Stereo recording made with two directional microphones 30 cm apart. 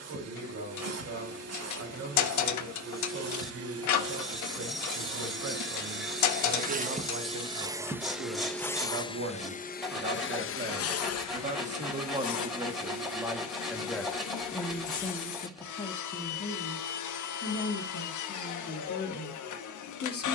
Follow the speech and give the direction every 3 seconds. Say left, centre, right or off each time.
right, right, right, right, centre, left, left.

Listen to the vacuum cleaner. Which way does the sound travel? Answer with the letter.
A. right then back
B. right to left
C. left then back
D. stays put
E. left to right
B.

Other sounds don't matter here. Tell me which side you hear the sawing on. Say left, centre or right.
centre.